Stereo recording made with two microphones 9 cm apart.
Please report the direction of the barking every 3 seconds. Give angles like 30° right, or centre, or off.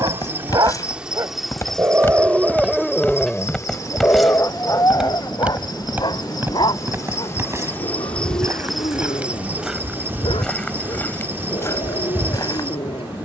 30° right, 30° left, 60° left, 70° left, 80° left.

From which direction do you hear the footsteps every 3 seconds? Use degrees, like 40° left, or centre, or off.
30° left, centre, 30° right, 10° left, 40° left.